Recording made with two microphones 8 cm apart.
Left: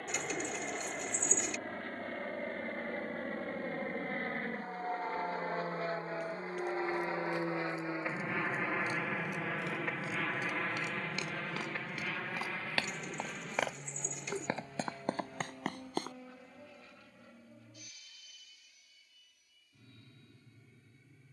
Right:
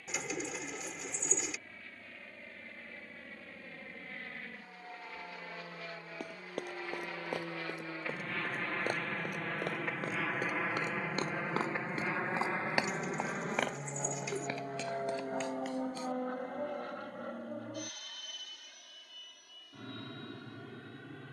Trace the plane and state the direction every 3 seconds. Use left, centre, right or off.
left, left, left, centre, right, right, right.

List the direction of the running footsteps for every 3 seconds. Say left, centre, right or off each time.
off, off, right, right, centre, left, off.